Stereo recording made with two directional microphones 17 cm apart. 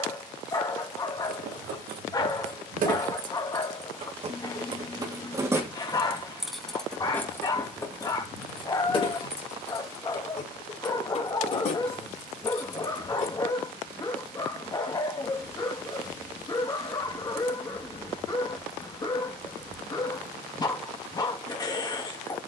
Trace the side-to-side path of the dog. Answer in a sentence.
In this clip you hear the dog stay put.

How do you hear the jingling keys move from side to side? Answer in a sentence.
In this clip you hear the jingling keys travel towards the left.